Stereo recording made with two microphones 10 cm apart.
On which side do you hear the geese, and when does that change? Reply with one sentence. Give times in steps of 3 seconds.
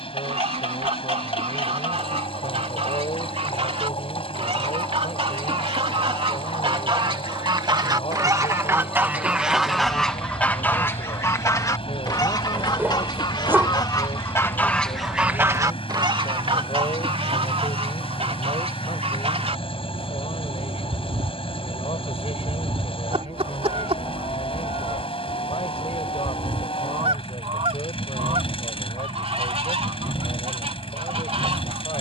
You can hear the geese on the right from 0 s, in the centre from 9 s, on the left from 12 s and on the right from 15 s.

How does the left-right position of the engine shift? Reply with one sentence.
You can hear the engine stay put.